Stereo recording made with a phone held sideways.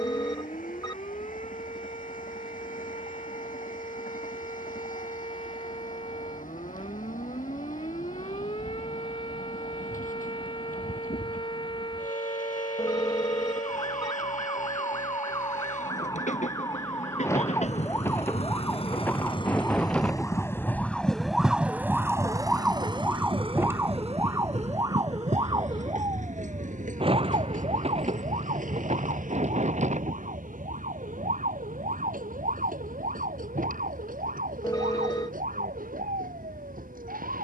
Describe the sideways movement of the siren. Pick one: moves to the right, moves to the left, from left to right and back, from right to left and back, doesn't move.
moves to the right.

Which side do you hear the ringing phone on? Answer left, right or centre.
left.